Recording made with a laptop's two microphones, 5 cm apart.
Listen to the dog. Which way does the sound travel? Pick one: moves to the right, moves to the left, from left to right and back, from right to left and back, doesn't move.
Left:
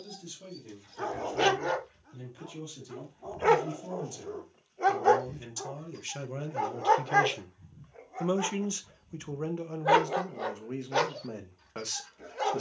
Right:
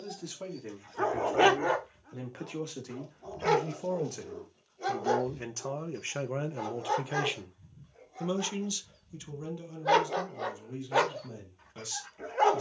from right to left and back.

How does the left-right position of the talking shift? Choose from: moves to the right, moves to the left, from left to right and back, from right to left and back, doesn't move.
moves to the left.